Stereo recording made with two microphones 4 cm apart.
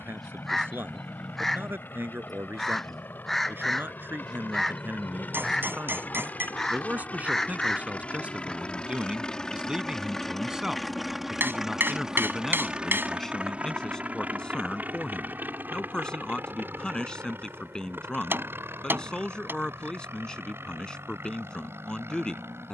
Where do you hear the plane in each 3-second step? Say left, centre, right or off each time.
left, left, left, centre, right, right, right, right.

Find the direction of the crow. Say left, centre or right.
centre.